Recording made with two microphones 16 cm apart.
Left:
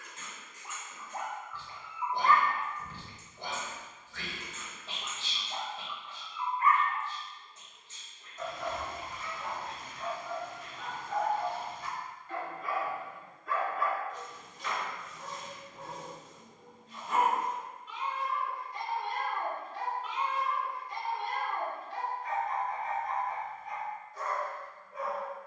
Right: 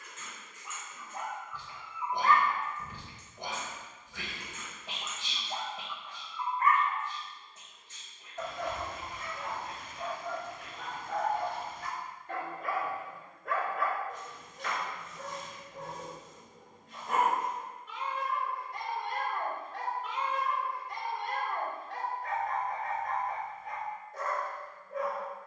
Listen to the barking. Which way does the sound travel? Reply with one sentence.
In this clip you hear the barking move from left to right.